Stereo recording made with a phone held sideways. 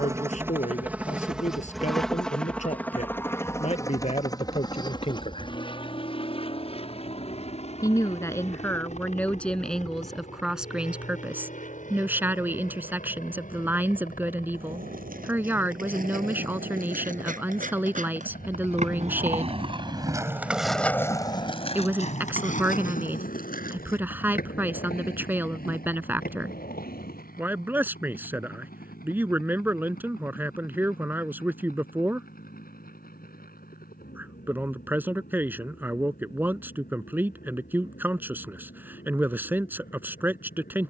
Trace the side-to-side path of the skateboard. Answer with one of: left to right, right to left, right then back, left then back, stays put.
right to left.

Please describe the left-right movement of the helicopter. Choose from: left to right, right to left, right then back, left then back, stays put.
right to left.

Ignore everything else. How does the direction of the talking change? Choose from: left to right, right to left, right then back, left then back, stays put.
left to right.